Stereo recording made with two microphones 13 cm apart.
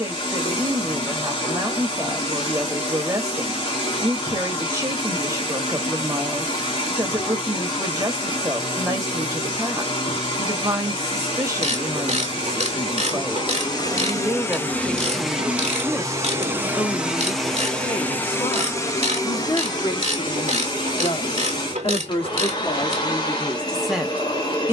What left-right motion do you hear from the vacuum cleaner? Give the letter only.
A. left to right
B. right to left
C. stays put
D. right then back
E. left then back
D.